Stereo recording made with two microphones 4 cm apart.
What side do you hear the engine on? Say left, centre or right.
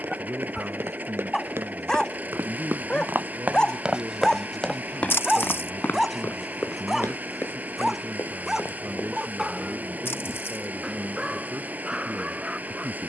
right.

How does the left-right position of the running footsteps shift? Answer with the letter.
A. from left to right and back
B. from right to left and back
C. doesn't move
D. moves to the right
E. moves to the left
E.